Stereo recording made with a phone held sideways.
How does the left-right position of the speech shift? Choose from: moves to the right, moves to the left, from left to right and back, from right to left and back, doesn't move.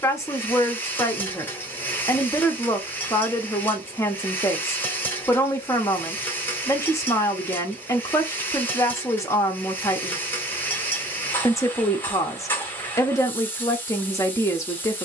doesn't move.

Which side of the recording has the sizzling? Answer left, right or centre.
centre.